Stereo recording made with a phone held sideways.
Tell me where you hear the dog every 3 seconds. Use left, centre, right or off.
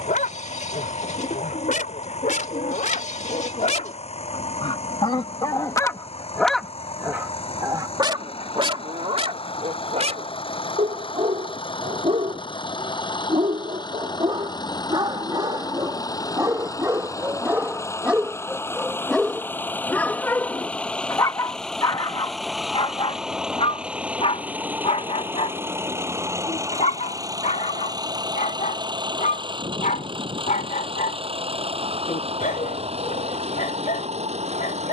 left, left, right, right, right, right, centre, left, left, left, left, left.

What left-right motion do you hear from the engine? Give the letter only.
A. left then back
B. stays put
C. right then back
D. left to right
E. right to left
D.